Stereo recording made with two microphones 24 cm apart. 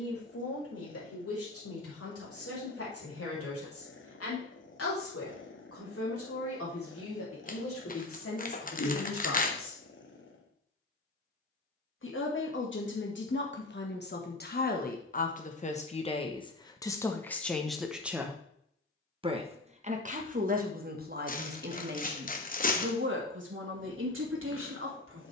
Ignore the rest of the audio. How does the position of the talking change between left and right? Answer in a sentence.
In this clip you hear the talking travel towards the right.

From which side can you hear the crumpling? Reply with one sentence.
You can hear the crumpling on the left.